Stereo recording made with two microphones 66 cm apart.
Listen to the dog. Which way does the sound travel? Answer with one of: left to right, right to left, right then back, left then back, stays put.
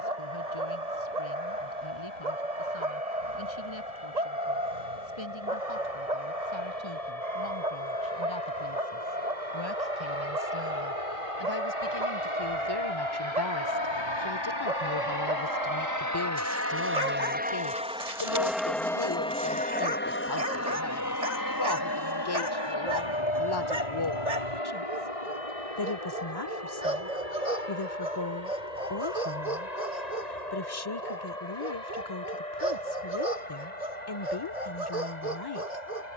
stays put.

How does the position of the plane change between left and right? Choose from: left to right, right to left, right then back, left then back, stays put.
right to left.